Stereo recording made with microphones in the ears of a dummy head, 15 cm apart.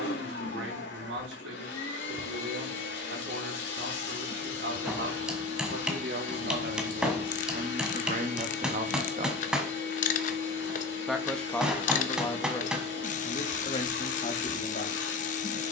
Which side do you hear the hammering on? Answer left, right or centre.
centre.